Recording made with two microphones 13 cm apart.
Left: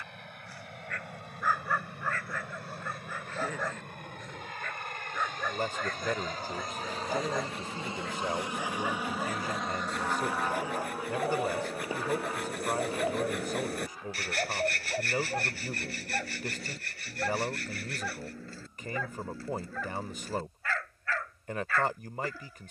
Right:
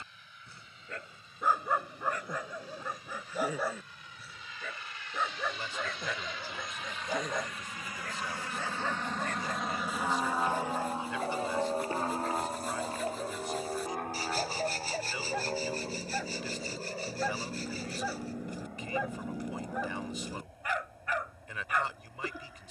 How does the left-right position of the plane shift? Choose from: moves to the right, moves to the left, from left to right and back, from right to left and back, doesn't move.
moves to the right.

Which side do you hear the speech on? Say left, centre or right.
left.